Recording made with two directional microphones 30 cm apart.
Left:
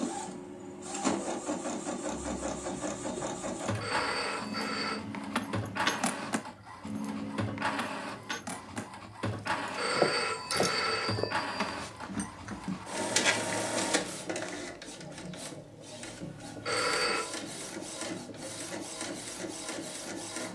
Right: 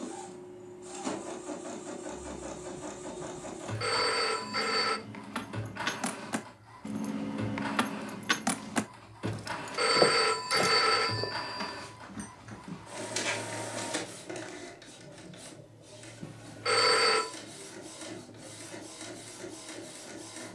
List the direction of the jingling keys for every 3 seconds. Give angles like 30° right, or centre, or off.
50° left, 40° left, 30° right, centre, 40° left, off, off.